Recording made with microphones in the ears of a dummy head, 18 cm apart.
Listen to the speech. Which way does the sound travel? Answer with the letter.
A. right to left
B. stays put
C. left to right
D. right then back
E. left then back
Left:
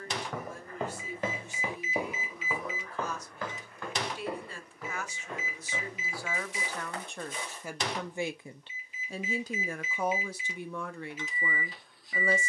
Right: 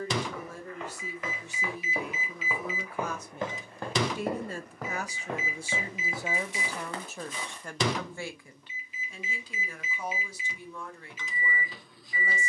A.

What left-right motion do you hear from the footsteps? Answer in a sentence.
You can hear the footsteps move to the right.